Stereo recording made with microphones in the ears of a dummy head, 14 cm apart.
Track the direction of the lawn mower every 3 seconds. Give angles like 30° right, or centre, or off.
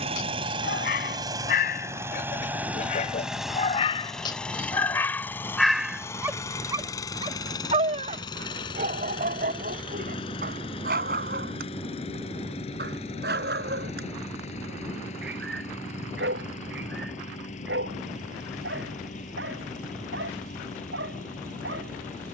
20° right, 10° left, 20° left, 40° left, 40° left, 50° left, 50° left, 50° left.